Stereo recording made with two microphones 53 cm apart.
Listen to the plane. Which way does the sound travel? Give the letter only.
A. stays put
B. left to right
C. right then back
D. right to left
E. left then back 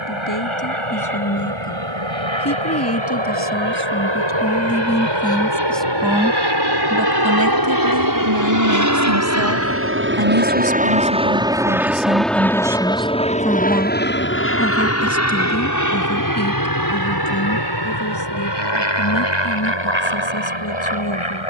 D.